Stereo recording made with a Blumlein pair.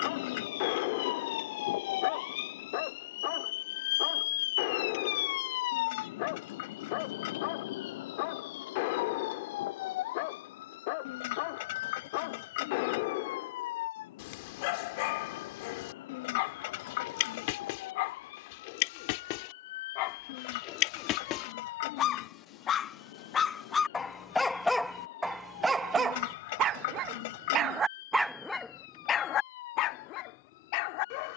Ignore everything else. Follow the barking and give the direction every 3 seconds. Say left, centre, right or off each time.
left, left, left, left, left, left, left, left, centre, centre, left.